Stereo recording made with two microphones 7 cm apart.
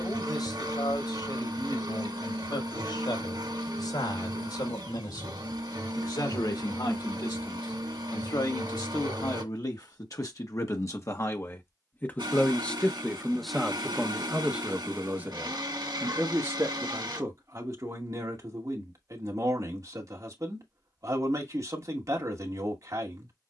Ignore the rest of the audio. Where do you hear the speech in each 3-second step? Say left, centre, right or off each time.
left, left, left, left, centre, right, right, right.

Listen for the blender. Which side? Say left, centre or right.
right.